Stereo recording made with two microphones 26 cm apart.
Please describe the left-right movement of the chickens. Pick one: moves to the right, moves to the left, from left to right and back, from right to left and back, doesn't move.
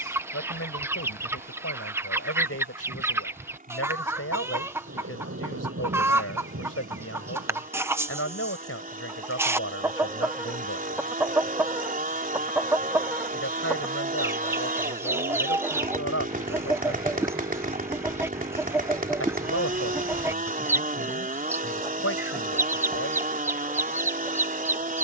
doesn't move.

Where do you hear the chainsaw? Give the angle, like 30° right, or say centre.
30° right.